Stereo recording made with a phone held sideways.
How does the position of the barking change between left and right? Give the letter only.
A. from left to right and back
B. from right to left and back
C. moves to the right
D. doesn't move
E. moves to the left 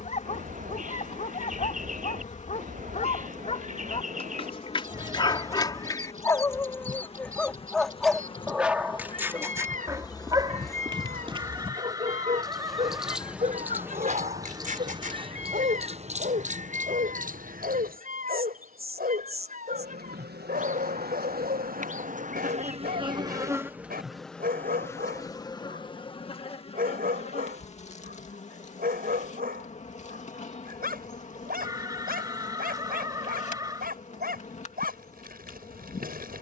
C.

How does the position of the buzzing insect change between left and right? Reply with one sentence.
You can hear the buzzing insect go right and come back.